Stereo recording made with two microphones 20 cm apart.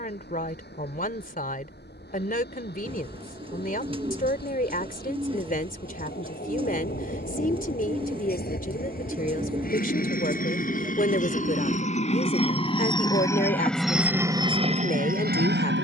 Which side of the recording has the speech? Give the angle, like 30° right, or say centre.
50° left.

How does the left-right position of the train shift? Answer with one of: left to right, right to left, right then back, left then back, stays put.
left to right.